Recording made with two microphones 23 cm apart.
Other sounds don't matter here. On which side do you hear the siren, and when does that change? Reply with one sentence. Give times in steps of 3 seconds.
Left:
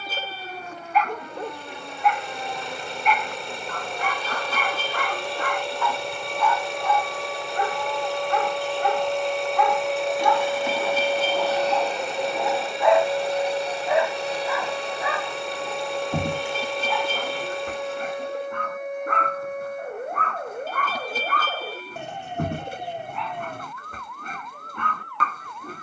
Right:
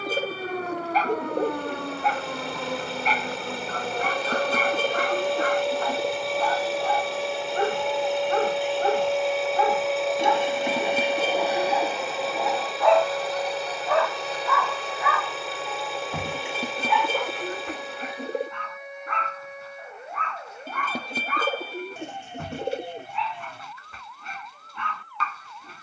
In this clip you hear the siren on the right from 0 s, in the centre from 9 s and on the left from 12 s.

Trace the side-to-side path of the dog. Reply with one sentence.
You can hear the dog travel towards the left.